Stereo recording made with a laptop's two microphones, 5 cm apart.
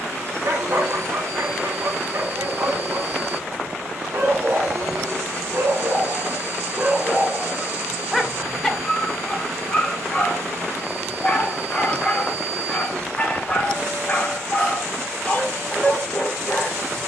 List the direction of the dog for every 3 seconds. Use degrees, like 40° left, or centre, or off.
70° right, 60° right, 20° right, 20° left, 20° left, 20° left.